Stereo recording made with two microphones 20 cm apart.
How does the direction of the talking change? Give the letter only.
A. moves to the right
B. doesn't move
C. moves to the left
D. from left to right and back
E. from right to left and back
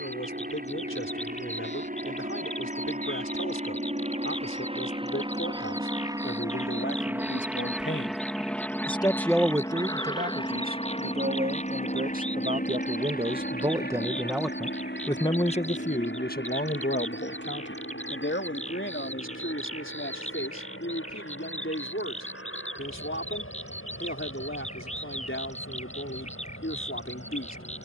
D.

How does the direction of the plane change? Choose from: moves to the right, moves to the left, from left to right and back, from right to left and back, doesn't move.
moves to the left.